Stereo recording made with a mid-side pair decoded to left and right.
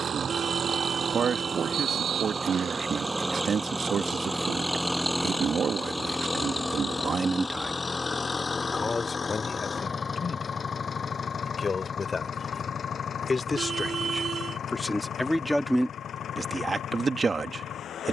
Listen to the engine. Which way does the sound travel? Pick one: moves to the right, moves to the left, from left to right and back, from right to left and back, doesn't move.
moves to the left.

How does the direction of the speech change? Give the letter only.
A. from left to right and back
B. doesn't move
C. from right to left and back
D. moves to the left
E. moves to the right
C.